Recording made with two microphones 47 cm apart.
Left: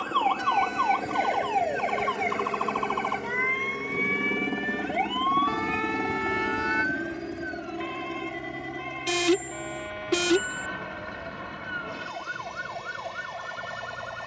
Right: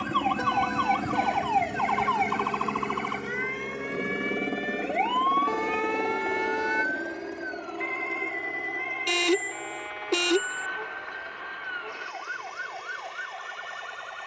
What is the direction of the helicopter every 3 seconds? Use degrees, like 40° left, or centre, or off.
30° right, 10° left, 40° left, 50° left, 60° left.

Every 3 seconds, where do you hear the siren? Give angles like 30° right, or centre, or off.
20° right, 30° left, 50° left, 60° left, 60° left.